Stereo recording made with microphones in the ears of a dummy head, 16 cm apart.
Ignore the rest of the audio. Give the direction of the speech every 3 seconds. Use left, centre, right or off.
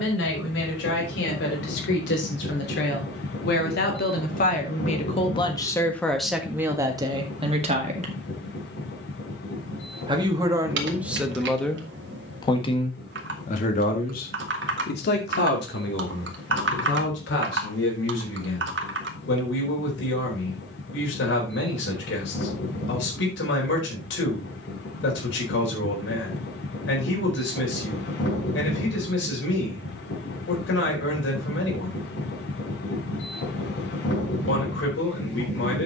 left, left, right, centre, left, left, left, left, left, left, left, left.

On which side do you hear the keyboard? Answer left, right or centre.
right.